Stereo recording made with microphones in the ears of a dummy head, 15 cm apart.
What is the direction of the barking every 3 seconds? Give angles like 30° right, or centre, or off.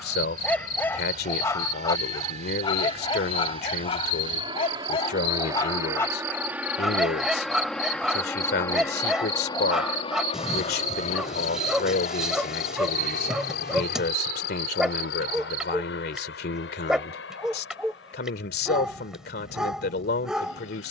20° left, 30° left, centre, centre, centre, centre, centre.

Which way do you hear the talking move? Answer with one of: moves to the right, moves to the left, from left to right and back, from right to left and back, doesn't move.
doesn't move.